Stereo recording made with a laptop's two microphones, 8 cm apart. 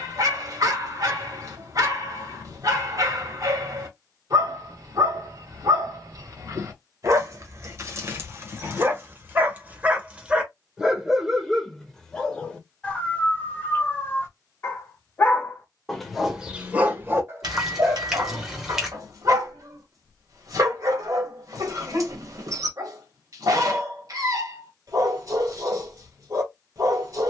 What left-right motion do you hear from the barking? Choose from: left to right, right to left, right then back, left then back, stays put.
left then back.